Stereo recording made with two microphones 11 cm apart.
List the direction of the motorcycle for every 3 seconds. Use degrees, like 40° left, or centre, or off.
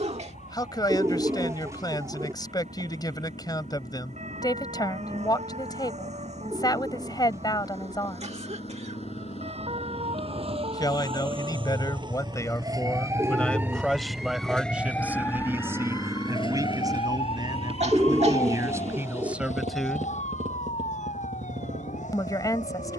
70° left, 70° left, 60° left, 50° left, 20° left, 30° right, 60° right, 80° right.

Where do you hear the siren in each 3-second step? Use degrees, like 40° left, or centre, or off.
70° right, 70° right, 70° right, 50° right, 20° right, 40° left, 70° left, 80° left.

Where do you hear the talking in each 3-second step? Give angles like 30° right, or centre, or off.
30° left, 30° left, 30° left, 30° left, 10° left, 30° right, 20° right, 30° left.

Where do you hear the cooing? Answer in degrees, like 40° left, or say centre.
20° right.